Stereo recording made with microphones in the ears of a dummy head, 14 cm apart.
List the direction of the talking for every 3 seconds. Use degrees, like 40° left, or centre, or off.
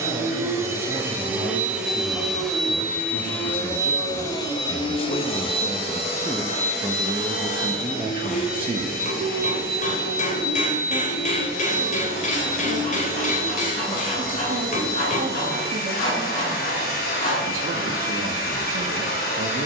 60° left, 40° left, 10° right, 50° right, 50° right, 50° right, 50° right.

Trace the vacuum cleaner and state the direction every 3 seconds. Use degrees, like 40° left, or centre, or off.
10° right, 20° left, 50° left, 60° left, 60° left, 60° left, 60° left.